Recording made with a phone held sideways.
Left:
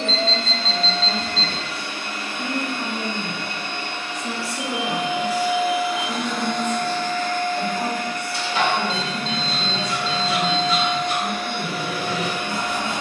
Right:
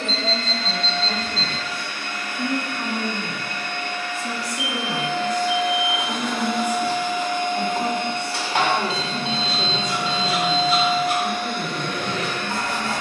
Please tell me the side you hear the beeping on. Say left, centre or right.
centre.